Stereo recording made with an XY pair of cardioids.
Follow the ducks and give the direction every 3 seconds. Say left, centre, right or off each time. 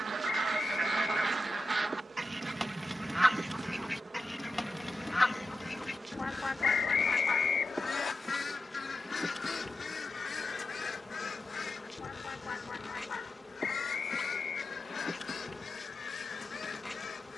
right, centre, left, left, left, left.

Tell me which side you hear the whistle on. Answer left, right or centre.
left.